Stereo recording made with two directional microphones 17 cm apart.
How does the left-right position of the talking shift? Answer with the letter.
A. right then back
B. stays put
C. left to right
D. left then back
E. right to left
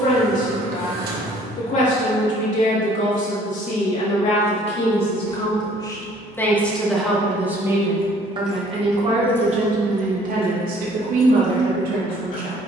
C.